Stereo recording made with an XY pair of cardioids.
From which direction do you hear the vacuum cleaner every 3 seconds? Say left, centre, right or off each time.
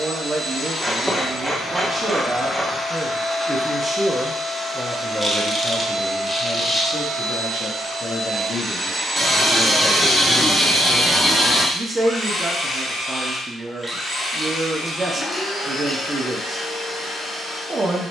left, centre, right, centre, left, left.